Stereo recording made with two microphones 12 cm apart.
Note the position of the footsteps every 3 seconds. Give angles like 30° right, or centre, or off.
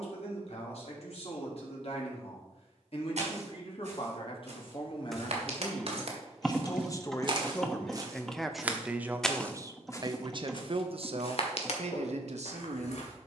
off, 60° right, 40° right, 40° left, 70° left.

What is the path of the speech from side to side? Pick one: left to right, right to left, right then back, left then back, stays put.
left to right.